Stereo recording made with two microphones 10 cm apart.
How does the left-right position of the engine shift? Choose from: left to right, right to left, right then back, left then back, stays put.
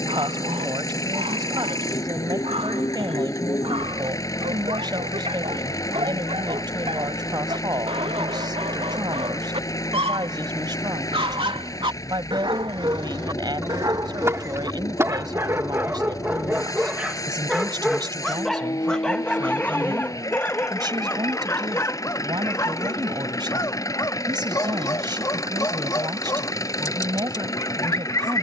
stays put.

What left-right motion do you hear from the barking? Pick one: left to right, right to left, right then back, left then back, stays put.
right to left.